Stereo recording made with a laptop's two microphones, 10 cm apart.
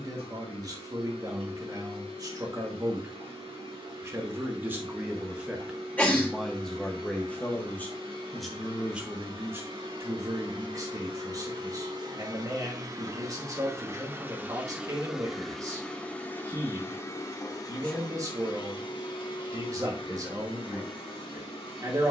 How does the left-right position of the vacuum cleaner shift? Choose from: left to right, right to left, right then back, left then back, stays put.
right to left.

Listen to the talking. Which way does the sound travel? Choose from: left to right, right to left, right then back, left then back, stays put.
left then back.